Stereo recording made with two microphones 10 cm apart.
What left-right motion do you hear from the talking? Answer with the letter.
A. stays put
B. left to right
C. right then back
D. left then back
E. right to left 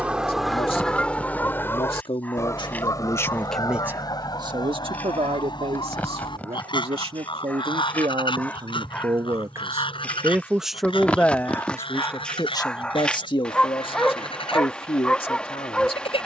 C.